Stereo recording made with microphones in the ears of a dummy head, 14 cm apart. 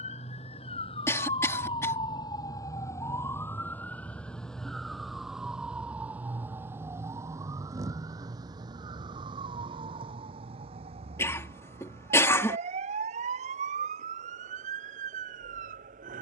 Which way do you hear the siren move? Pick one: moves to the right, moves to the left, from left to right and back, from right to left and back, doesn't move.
moves to the right.